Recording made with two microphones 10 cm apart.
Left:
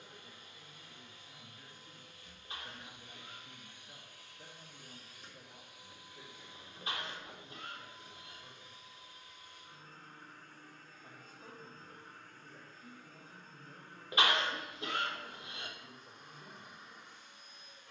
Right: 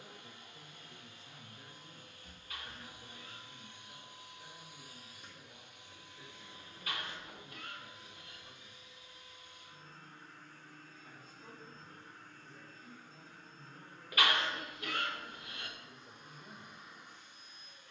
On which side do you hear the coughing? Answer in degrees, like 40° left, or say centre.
20° left.